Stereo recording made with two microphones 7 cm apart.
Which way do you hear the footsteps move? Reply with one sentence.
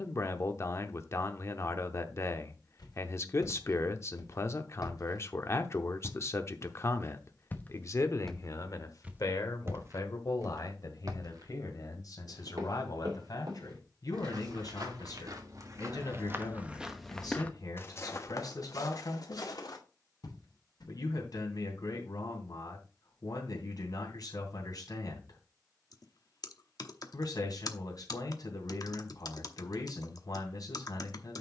In this clip you hear the footsteps go right and come back.